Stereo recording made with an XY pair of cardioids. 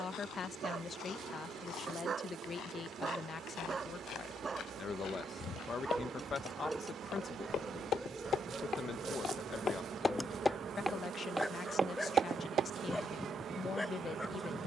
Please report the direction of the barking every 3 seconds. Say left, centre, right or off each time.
right, right, centre, centre, centre.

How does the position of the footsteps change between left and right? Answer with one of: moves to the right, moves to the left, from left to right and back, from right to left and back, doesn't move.
moves to the right.